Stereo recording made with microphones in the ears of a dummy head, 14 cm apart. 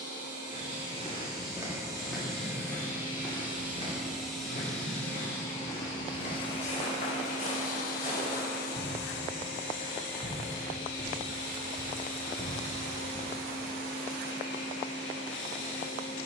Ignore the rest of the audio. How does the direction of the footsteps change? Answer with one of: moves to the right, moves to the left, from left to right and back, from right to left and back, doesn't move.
from right to left and back.